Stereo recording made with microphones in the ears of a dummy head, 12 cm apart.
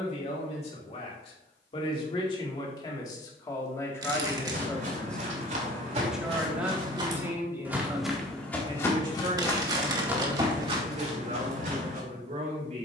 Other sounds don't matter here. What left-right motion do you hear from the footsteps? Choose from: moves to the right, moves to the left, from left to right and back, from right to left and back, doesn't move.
from right to left and back.